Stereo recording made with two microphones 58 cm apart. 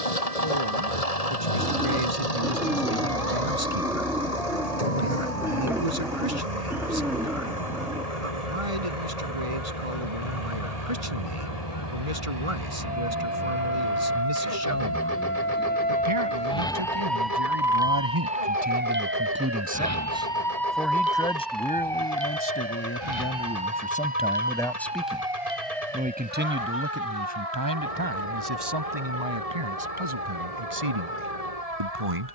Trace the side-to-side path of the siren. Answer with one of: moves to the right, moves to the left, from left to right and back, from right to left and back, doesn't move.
moves to the right.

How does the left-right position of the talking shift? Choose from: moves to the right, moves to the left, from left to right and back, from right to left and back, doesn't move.
from right to left and back.